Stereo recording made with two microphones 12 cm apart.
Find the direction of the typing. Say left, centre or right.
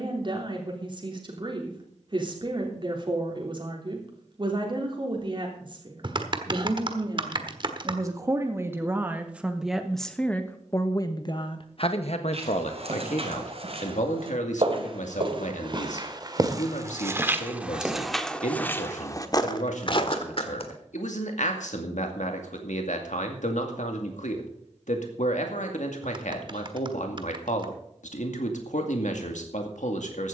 right.